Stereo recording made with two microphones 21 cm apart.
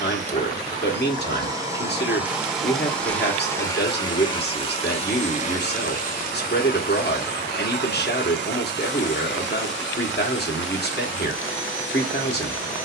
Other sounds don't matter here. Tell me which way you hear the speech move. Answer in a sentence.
You can hear the speech stay in one place.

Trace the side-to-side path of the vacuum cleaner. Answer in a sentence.
In this clip you hear the vacuum cleaner move to the left.